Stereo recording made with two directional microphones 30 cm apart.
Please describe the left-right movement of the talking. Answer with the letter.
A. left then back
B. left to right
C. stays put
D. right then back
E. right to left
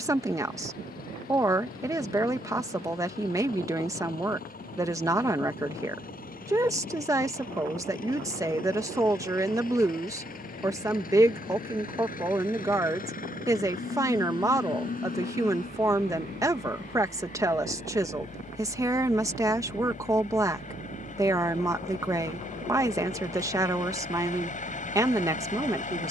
C.